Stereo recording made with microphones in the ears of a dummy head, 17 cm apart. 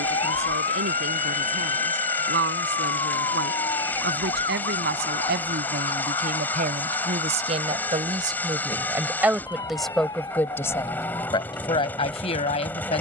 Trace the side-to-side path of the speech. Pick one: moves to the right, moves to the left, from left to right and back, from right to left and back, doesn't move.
moves to the left.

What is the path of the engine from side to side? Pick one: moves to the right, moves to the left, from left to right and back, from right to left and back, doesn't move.
doesn't move.